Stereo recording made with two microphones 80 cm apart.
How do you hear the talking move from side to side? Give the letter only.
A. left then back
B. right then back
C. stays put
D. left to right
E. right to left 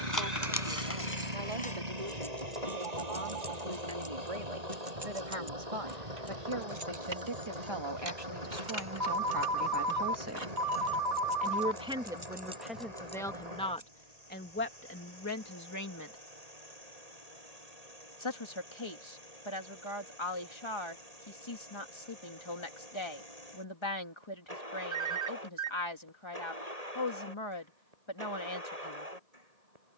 E.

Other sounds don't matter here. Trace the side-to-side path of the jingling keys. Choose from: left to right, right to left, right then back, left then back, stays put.
right then back.